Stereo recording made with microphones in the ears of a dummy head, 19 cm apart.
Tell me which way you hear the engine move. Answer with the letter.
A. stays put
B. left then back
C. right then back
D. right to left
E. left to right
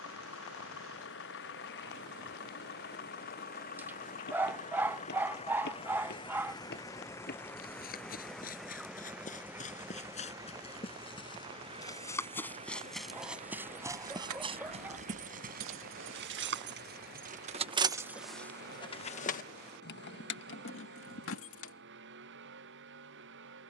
E.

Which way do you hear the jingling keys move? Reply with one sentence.
You can hear the jingling keys move from right to left.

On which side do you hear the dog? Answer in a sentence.
You can hear the dog in the centre.